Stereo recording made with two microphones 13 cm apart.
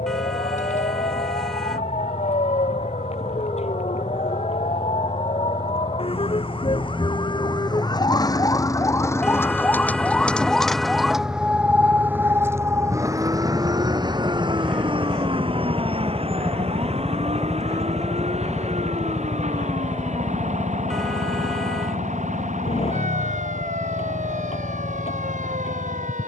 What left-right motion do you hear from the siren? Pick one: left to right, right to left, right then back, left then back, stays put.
left to right.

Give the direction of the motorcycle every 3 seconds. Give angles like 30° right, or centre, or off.
50° right, 40° right, 30° right, 20° right, centre, 10° left, 30° left, 50° left, 60° left.